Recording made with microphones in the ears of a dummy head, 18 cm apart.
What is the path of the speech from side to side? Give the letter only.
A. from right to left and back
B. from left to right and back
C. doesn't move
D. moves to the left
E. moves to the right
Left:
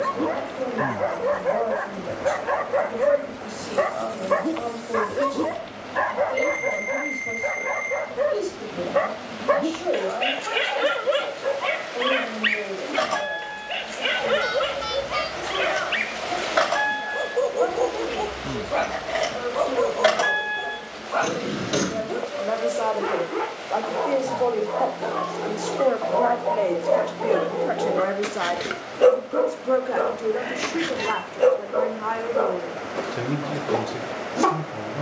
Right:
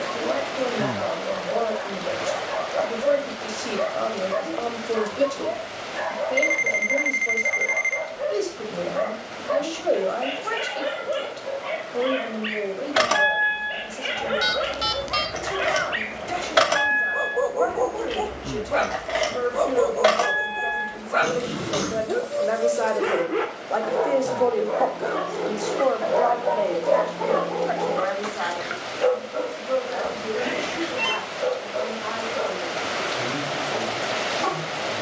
D.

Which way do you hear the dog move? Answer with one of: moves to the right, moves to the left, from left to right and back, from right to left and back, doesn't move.
from left to right and back.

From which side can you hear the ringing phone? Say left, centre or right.
right.